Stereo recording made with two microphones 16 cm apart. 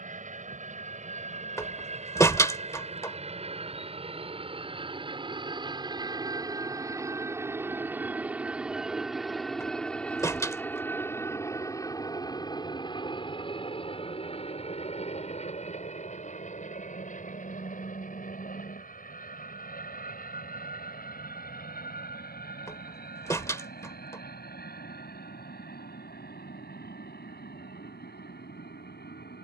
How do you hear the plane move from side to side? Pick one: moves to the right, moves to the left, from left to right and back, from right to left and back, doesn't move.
moves to the left.